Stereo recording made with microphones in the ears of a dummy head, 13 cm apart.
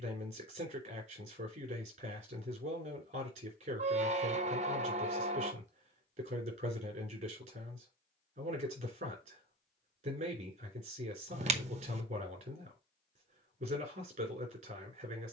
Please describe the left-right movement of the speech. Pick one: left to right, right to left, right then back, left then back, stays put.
stays put.